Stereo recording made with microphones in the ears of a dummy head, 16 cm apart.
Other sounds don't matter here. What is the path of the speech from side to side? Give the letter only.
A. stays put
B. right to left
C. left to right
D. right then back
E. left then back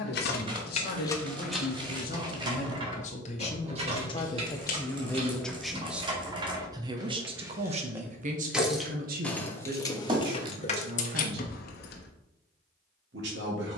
C.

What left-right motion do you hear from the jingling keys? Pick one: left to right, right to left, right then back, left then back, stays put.
right then back.